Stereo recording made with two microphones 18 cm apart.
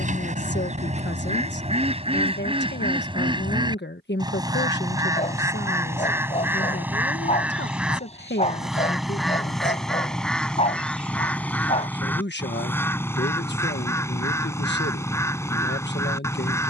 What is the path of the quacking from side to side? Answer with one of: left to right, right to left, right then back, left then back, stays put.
right to left.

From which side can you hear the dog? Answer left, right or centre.
left.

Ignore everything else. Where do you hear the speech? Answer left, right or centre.
left.